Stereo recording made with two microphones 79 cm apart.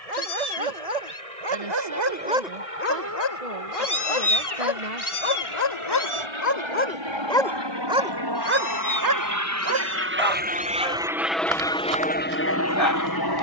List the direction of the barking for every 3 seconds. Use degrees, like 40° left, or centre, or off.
30° right, 40° left, 10° left, 40° right, 50° right.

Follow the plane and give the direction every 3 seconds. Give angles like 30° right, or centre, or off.
60° right, 50° right, 40° right, 10° right, 20° left.